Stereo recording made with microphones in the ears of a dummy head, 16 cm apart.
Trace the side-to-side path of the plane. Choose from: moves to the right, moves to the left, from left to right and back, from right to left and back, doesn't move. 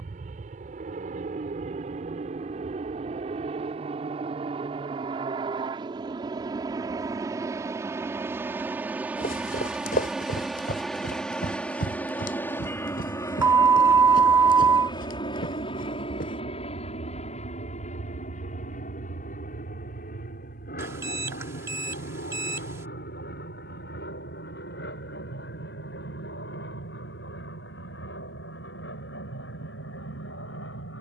moves to the left.